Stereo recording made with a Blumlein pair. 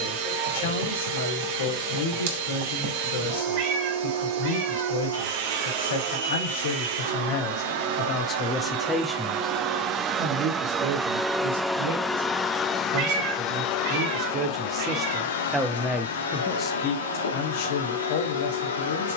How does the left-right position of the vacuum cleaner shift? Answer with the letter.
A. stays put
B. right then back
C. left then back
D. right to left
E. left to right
D.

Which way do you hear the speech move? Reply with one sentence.
You can hear the speech go right and come back.